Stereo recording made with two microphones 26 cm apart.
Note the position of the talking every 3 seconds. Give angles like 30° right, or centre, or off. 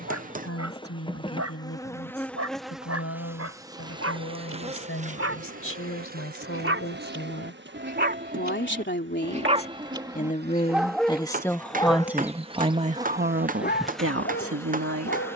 60° left, 60° left, 50° left, 20° left, 40° right.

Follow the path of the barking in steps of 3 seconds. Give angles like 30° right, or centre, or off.
70° right, 60° right, 40° right, 10° right, 40° left.